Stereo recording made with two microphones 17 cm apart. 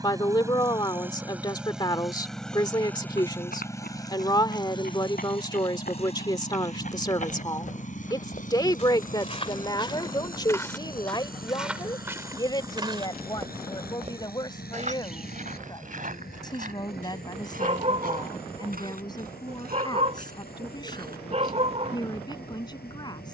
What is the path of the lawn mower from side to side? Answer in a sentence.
In this clip you hear the lawn mower move to the left.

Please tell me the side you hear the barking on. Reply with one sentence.
You can hear the barking on the right.